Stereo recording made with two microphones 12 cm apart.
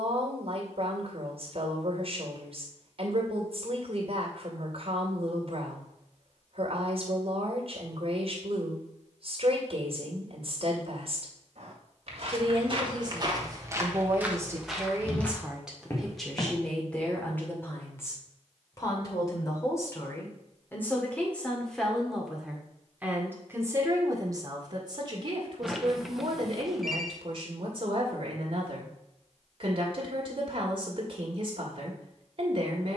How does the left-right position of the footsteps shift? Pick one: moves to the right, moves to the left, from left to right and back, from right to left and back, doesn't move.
moves to the left.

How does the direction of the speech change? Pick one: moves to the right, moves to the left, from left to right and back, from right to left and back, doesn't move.
from right to left and back.